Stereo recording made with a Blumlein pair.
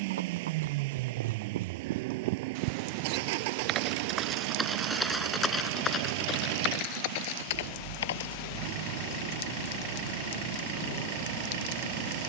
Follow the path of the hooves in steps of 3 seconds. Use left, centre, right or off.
right, centre, left, off.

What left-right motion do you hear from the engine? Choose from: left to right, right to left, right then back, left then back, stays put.
stays put.